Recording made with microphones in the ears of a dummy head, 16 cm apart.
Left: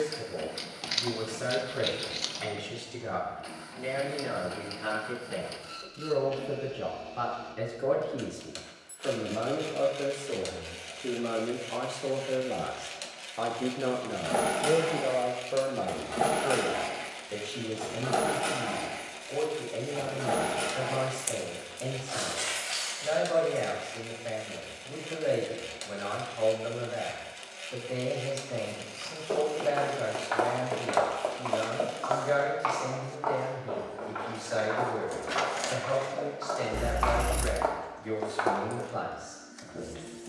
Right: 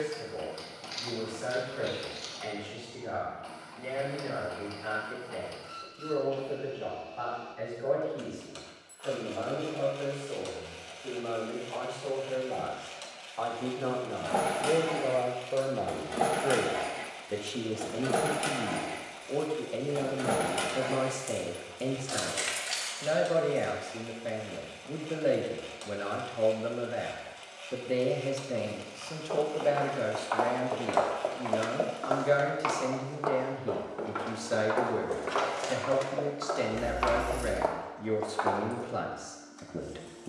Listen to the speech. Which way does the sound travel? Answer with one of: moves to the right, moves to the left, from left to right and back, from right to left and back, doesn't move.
moves to the right.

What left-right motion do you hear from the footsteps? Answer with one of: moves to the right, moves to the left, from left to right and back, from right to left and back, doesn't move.
from left to right and back.